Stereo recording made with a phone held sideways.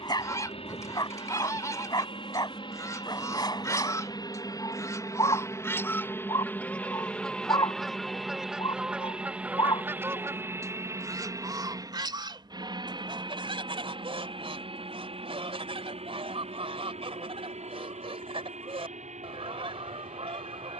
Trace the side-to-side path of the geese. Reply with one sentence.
You can hear the geese move from left to right.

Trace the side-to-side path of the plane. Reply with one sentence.
You can hear the plane move from left to right.